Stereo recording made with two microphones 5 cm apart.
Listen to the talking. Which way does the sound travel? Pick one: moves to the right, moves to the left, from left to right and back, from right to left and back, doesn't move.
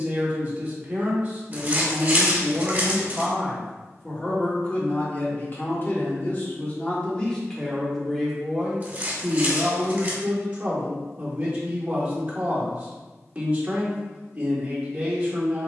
from right to left and back.